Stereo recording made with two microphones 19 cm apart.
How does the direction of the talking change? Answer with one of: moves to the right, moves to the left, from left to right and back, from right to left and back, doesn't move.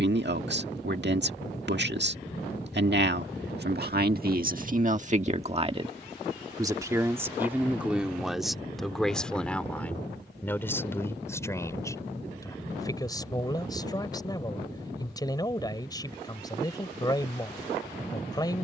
moves to the left.